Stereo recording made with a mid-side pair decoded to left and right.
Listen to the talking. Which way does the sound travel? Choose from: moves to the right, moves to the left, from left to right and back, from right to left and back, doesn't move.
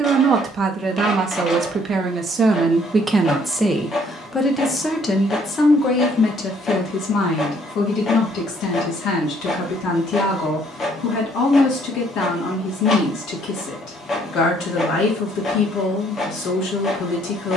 moves to the left.